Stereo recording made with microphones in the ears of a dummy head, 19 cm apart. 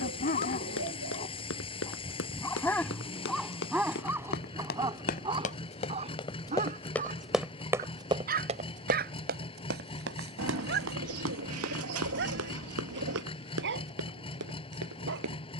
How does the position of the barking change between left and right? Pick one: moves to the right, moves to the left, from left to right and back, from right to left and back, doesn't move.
moves to the right.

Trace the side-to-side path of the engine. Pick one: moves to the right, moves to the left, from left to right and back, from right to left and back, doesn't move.
doesn't move.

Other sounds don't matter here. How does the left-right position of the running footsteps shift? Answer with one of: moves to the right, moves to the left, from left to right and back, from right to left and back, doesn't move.
moves to the right.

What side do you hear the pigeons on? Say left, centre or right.
right.